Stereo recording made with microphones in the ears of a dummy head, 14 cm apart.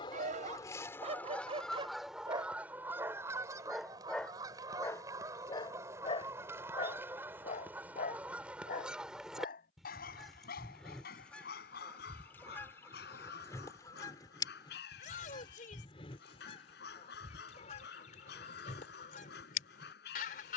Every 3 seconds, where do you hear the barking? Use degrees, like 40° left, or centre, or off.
40° right, 10° left, 50° left, 60° left, 70° left, 70° left, 70° left.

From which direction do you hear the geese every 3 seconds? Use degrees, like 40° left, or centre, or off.
10° left, 20° right, 10° right, centre, 20° left, 40° left, 50° left.